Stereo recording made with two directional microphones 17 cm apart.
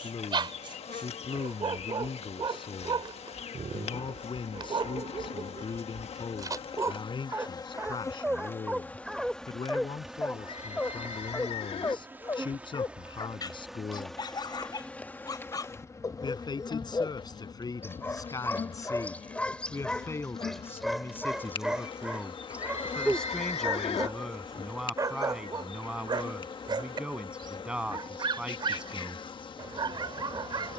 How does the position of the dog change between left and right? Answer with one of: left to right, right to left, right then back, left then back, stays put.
left then back.